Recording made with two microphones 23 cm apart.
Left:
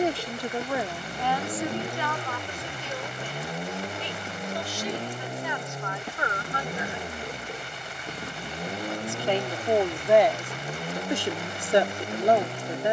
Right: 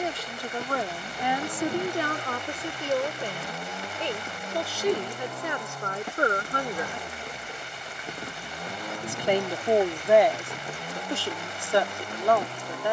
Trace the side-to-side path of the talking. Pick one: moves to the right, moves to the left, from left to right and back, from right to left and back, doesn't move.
from left to right and back.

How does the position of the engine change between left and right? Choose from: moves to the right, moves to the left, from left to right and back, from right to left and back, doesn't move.
doesn't move.